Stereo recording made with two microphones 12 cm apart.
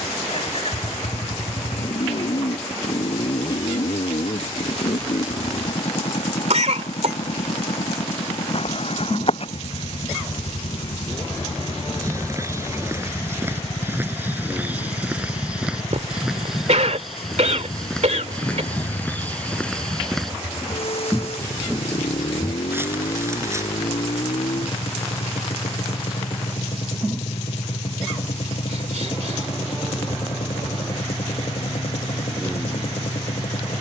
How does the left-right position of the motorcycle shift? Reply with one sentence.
You can hear the motorcycle stay put.